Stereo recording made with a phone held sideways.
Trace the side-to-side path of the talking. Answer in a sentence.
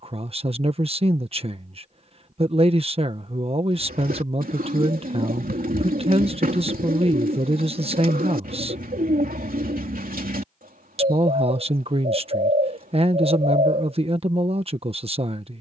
You can hear the talking stay put.